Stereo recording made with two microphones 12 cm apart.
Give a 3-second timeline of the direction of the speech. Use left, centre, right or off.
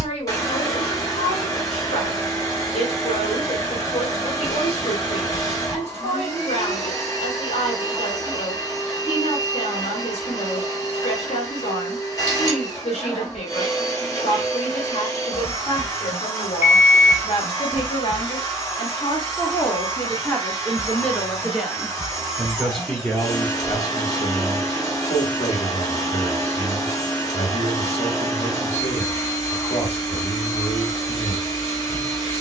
left, left, left, left, left, left, left, centre, left, left, left.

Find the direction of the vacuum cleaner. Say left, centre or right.
left.